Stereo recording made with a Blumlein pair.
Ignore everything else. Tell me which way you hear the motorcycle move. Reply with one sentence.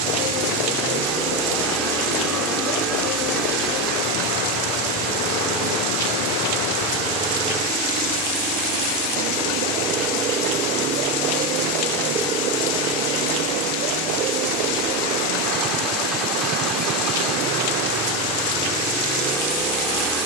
In this clip you hear the motorcycle stay put.